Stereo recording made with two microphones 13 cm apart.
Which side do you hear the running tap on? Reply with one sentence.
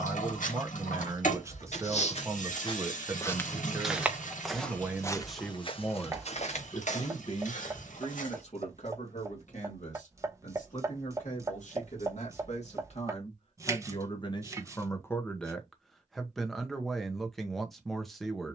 In this clip you hear the running tap on the left.